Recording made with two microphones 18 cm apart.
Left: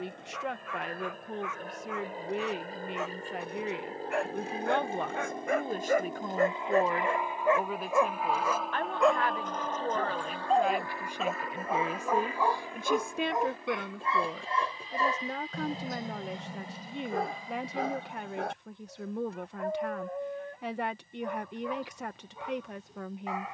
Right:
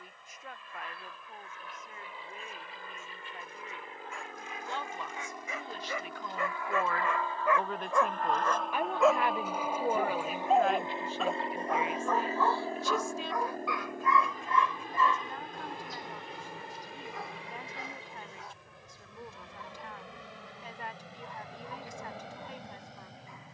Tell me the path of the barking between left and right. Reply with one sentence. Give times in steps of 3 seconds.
In this clip you hear the barking on the left from 0 s, in the centre from 9 s and on the left from 12 s.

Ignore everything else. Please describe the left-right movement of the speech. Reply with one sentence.
In this clip you hear the speech go right and come back.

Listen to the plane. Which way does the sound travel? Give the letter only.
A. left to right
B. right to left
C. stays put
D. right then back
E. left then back
A.